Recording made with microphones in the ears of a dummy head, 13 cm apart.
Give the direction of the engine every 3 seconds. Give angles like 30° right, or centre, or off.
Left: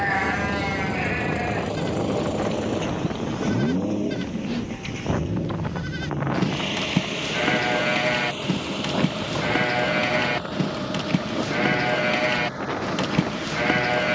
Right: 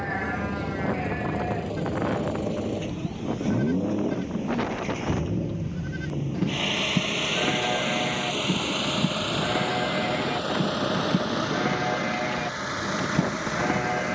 30° left, 10° left, 30° right, 50° right, 60° right.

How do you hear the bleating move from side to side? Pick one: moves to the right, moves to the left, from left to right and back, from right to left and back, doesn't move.
doesn't move.